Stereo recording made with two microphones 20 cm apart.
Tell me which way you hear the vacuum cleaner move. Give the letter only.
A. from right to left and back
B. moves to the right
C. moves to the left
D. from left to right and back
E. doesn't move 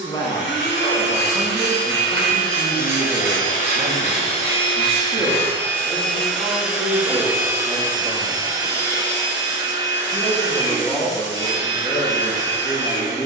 B.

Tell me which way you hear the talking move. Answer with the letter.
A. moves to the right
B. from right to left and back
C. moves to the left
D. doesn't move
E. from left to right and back
E.